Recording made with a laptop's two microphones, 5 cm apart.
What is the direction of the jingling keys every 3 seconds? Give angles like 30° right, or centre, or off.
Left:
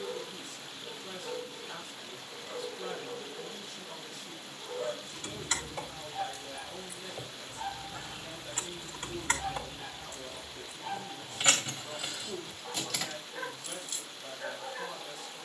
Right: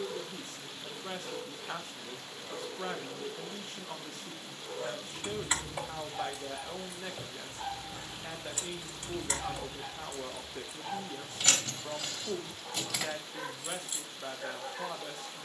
off, 20° right, 20° left, 40° left, centre.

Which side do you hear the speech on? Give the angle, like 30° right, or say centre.
50° right.